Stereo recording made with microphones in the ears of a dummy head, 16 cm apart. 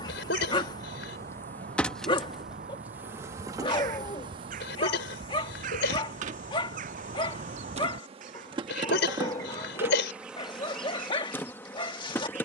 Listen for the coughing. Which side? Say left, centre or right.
left.